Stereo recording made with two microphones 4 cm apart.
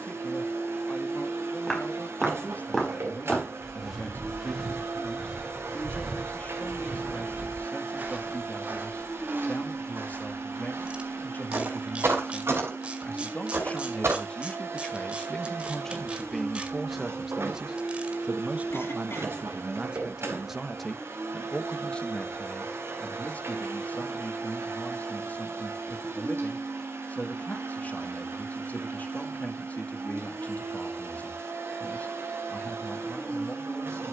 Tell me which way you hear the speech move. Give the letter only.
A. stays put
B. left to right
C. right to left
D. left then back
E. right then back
E.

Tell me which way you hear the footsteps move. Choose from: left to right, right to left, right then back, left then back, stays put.
left to right.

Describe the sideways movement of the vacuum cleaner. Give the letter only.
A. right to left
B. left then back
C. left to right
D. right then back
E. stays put
E.